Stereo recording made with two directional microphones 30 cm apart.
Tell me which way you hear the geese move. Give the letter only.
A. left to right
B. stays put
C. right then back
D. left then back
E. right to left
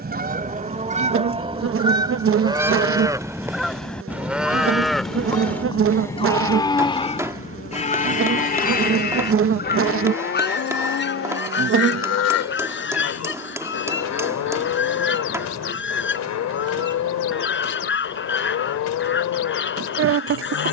E.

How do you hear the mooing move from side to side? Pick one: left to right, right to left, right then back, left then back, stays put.
right to left.